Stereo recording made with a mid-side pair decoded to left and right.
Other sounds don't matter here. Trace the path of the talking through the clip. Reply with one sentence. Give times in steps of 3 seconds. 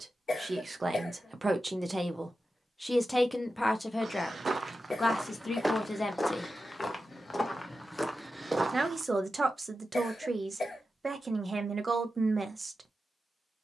You can hear the talking on the right from 0 s, on the left from 3 s, in the centre from 6 s and on the right from 9 s.